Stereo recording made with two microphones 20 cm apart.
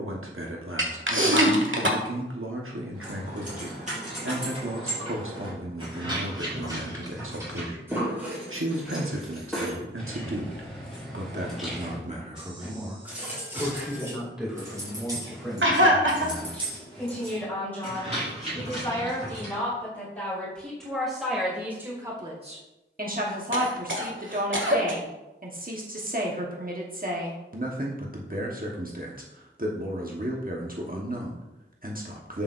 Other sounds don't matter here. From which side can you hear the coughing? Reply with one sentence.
In this clip you hear the coughing on the right.